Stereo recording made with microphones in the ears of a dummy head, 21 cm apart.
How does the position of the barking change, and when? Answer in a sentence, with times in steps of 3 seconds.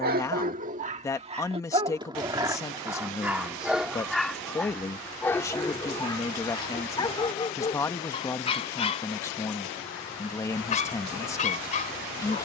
In this clip you hear the barking on the right from 0 s, in the centre from 3 s and on the left from 6 s.